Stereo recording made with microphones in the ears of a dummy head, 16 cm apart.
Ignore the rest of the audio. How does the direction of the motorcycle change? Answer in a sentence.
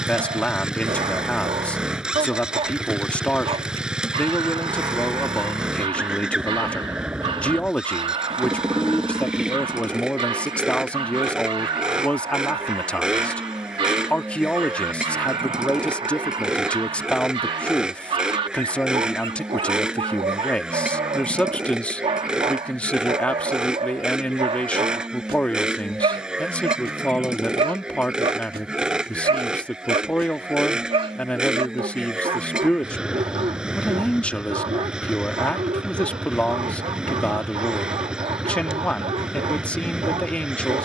In this clip you hear the motorcycle stay in one place.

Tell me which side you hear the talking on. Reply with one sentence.
You can hear the talking in the centre.